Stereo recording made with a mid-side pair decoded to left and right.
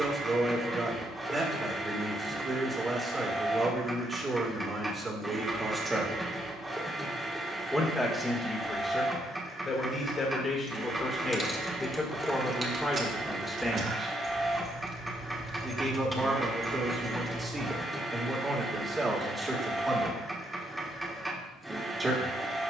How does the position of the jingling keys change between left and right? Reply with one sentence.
In this clip you hear the jingling keys go right and come back.